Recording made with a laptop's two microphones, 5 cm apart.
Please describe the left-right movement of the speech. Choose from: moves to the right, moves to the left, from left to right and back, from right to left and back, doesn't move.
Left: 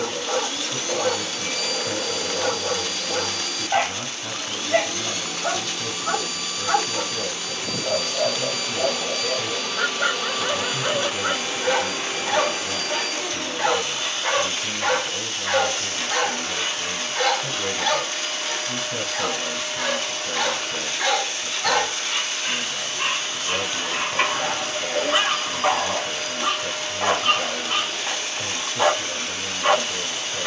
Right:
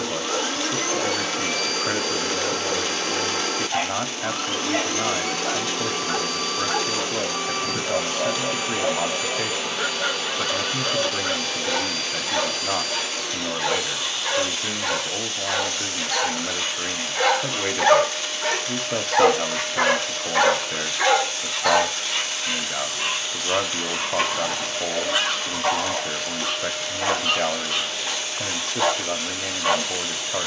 doesn't move.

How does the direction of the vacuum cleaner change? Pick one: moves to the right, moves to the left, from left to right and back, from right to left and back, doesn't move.
moves to the left.